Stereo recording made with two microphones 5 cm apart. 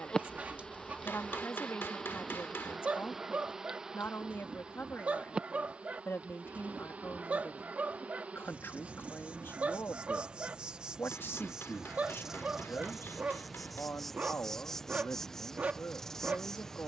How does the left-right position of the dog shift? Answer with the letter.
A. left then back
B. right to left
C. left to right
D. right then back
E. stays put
E.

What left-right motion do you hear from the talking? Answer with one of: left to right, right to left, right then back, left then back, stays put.
stays put.